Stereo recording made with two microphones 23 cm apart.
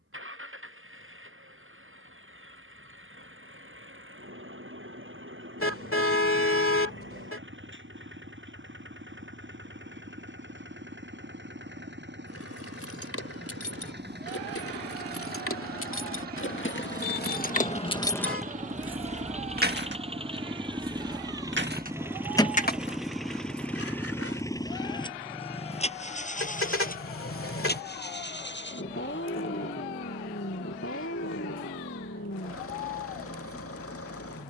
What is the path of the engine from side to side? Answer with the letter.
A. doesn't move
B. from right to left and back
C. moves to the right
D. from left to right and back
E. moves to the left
E.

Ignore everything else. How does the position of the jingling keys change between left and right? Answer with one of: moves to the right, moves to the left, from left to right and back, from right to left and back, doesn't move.
from left to right and back.